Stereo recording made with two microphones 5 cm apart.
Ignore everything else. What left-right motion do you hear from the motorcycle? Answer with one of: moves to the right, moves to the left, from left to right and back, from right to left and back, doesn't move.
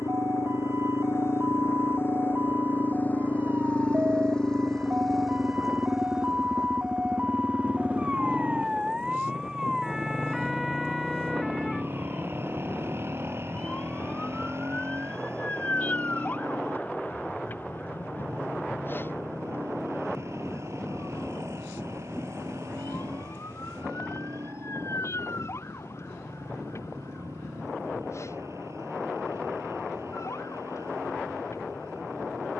moves to the right.